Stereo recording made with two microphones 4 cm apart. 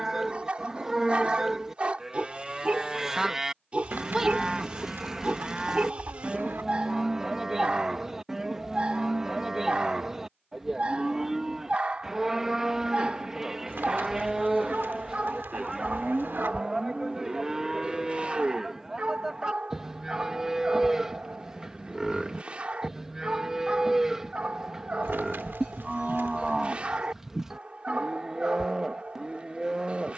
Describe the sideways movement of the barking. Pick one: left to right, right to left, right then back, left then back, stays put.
stays put.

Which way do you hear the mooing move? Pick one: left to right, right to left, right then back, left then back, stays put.
stays put.